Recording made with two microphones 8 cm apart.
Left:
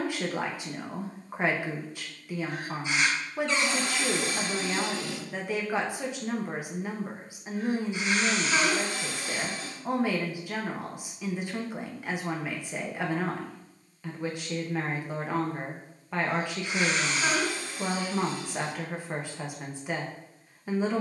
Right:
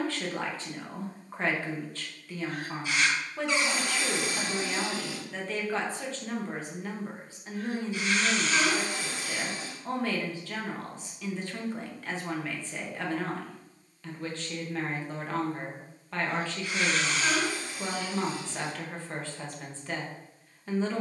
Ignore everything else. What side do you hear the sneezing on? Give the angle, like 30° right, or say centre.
20° left.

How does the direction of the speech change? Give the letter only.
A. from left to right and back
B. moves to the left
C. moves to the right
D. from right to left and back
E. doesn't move
E.